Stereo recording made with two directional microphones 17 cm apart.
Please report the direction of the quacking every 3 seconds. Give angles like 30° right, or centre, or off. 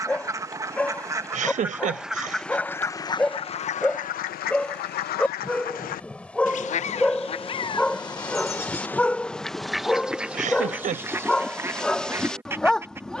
10° right, 50° left, 30° left, 10° right, 10° right.